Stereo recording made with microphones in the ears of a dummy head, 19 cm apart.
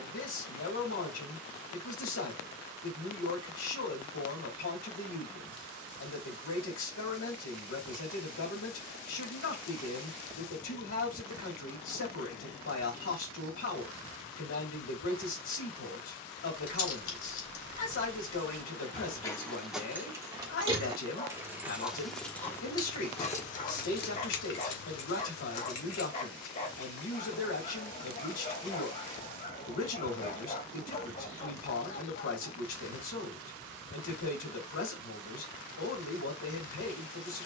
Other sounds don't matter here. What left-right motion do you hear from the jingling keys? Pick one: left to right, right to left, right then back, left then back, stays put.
right then back.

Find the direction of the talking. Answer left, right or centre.
left.